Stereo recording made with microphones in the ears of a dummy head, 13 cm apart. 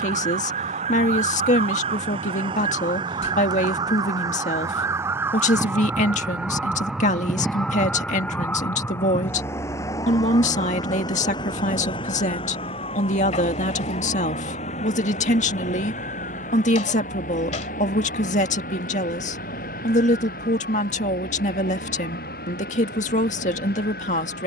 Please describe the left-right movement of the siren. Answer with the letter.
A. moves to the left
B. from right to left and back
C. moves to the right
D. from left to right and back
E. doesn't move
A.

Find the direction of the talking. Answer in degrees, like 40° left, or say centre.
50° left.